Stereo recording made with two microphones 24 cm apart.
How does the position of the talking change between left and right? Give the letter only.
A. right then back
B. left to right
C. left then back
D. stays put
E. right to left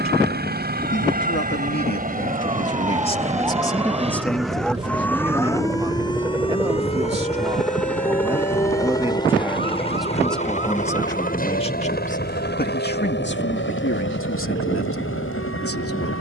A.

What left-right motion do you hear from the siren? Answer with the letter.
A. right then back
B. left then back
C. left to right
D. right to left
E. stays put
D.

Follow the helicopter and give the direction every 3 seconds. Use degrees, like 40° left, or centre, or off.
40° right, 20° right, centre, 30° left, 50° left, 60° left.